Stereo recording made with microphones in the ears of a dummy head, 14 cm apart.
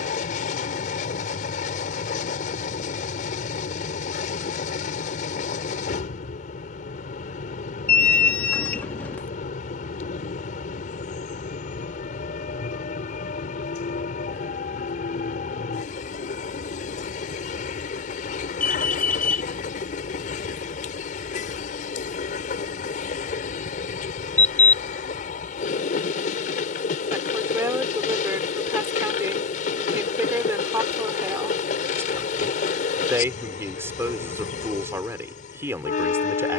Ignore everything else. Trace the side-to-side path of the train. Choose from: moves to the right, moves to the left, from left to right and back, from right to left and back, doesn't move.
doesn't move.